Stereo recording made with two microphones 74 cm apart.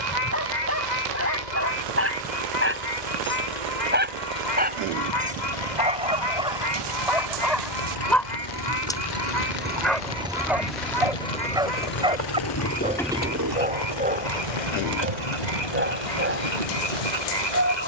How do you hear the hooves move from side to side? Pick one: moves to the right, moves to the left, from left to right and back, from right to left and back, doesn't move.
moves to the right.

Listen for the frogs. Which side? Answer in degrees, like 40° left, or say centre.
70° left.